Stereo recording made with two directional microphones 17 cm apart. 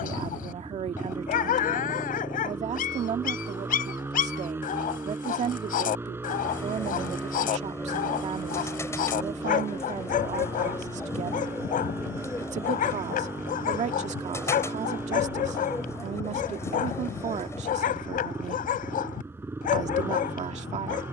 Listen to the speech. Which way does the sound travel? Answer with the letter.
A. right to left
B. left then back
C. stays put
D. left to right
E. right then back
C.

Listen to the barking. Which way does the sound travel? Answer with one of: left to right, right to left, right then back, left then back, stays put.
stays put.